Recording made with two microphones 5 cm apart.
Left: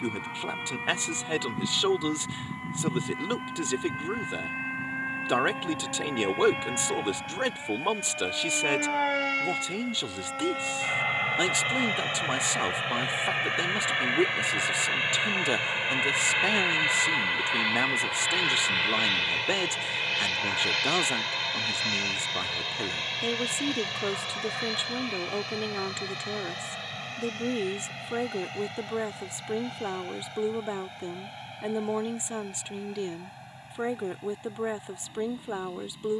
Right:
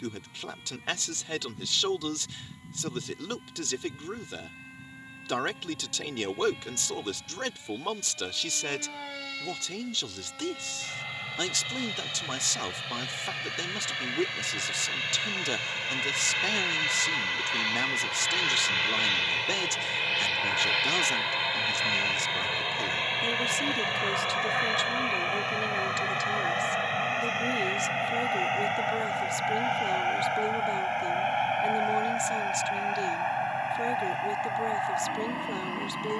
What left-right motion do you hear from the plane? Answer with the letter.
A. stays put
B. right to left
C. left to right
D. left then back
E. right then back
C.